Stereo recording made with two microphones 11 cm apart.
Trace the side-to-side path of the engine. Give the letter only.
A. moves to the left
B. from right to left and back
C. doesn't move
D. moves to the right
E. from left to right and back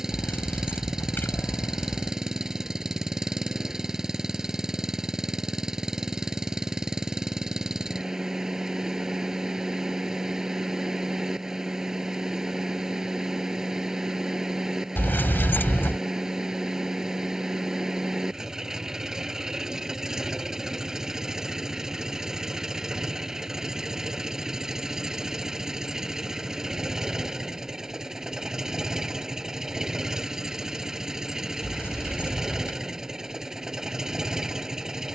C.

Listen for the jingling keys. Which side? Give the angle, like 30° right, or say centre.
20° left.